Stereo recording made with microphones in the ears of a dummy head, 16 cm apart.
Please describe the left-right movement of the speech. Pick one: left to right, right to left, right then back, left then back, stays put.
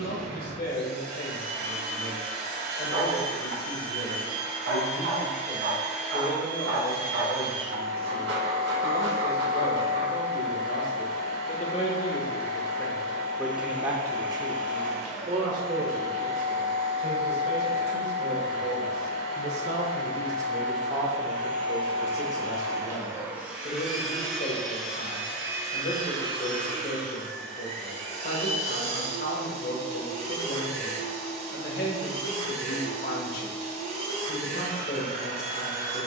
right then back.